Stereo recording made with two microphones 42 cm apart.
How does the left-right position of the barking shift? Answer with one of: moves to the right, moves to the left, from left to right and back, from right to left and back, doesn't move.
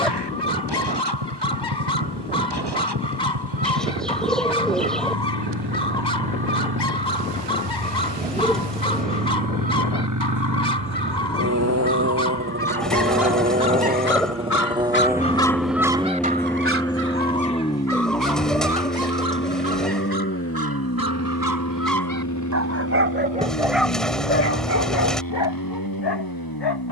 from left to right and back.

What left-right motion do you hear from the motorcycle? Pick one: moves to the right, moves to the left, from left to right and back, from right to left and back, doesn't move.
moves to the left.